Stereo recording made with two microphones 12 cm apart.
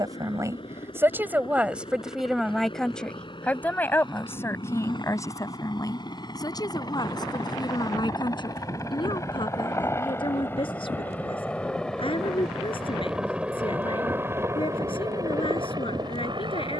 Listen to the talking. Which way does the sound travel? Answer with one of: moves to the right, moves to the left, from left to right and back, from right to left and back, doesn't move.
moves to the left.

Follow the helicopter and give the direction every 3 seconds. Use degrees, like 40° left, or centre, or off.
50° left, 50° left, 40° left, 20° left, 10° right, 40° right.